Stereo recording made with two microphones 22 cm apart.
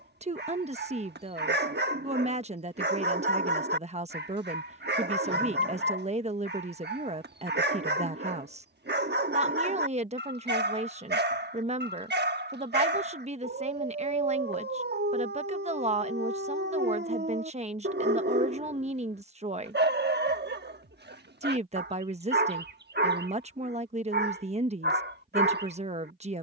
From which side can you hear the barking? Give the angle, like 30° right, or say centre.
50° right.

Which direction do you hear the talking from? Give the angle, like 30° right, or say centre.
30° right.